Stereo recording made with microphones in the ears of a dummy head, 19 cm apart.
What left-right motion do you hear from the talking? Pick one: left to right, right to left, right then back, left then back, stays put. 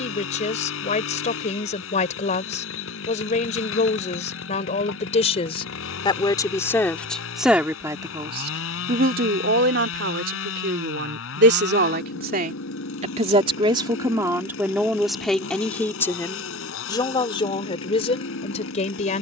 right then back.